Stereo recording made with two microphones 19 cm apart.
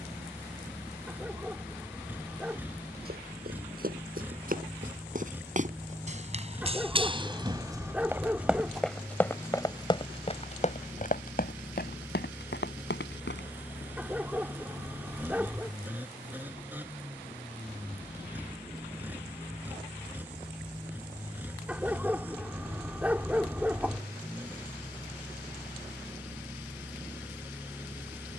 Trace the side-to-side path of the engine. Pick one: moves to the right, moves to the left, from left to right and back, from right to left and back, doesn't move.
doesn't move.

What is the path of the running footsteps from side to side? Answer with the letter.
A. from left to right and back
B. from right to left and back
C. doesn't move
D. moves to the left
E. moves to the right
D.